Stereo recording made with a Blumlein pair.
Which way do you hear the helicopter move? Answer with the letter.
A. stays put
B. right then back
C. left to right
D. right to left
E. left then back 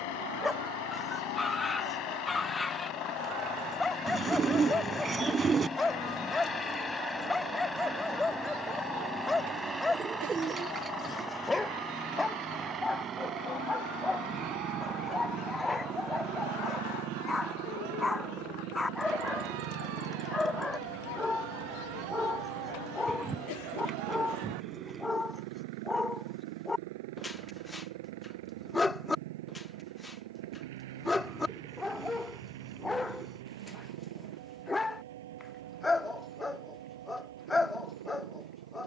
C.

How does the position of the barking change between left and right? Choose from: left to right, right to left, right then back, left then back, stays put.
stays put.